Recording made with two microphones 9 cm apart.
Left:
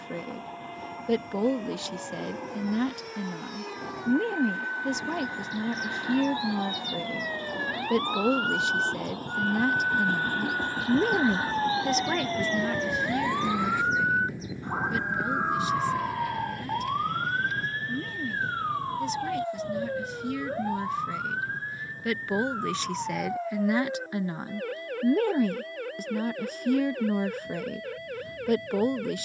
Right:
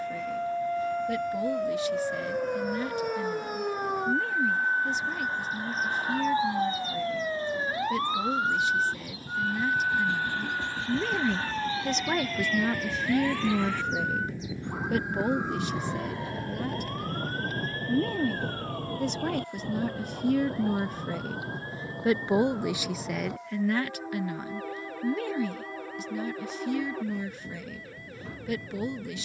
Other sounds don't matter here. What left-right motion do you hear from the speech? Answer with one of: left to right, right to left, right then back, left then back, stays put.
right then back.